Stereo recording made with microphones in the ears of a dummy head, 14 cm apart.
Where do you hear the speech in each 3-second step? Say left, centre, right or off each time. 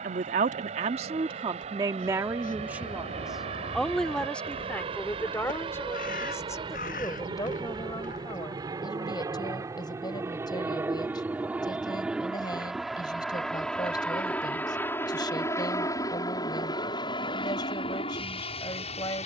right, centre, left, left, left, left, left.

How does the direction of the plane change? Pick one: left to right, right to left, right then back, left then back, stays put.
right to left.